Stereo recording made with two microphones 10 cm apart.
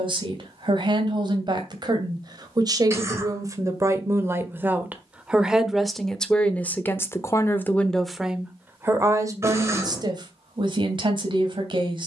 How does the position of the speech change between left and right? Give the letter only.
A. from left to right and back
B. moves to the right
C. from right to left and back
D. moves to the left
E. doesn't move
C.